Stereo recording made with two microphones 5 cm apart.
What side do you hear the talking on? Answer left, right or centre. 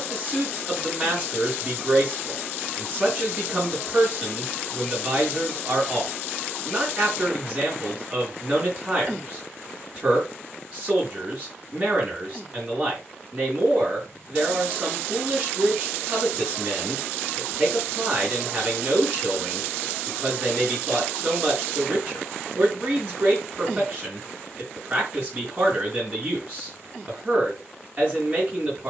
right.